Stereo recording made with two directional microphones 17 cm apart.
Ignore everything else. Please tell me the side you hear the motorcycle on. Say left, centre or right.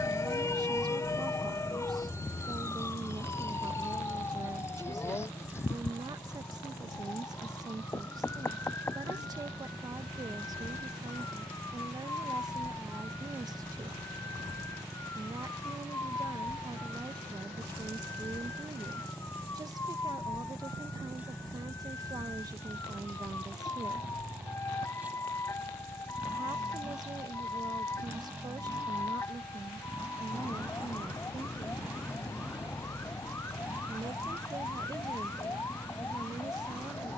centre.